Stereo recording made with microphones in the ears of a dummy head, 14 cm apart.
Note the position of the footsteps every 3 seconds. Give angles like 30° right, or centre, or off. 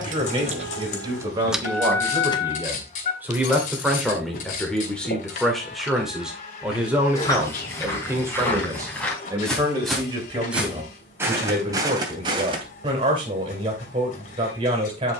off, off, 20° left, 10° right, 30° right.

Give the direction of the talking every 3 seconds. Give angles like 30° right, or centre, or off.
20° right, centre, 10° right, 30° right, 30° right.